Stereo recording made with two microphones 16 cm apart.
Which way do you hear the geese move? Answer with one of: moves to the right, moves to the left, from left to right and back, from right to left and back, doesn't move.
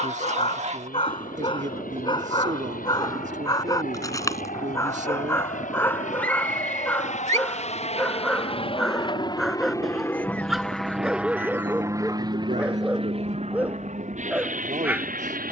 doesn't move.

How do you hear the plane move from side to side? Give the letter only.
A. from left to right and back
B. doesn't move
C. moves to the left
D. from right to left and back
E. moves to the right
E.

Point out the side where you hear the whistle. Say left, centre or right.
centre.